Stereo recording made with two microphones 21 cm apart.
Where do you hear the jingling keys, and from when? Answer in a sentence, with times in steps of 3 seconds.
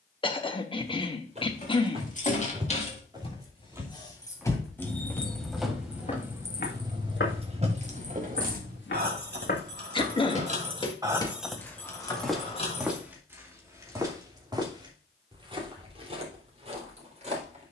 In this clip you hear the jingling keys on the left from 0 s, in the centre from 3 s, on the right from 6 s, on the left from 12 s and not at all from 15 s.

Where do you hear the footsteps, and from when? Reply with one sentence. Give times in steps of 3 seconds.
You can hear the footsteps on the right from 0 s, in the centre from 3 s, on the left from 6 s, in the centre from 12 s and on the right from 15 s.